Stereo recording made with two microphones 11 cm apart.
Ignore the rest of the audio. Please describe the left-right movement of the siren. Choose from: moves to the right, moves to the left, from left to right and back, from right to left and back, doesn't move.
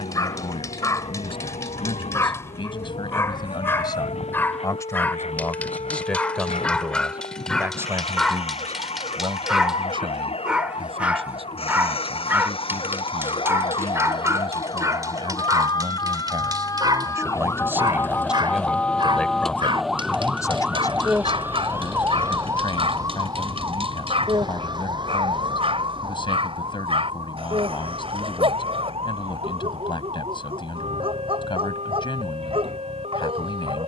moves to the right.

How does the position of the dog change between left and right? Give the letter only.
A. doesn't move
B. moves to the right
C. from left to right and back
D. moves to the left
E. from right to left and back
B.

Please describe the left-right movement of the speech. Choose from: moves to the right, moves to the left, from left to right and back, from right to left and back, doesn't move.
from left to right and back.